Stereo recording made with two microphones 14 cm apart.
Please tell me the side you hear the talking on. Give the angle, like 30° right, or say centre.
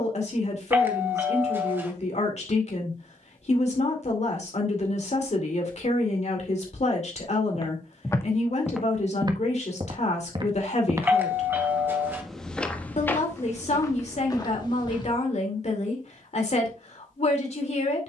50° left.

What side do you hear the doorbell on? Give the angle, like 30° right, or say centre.
10° right.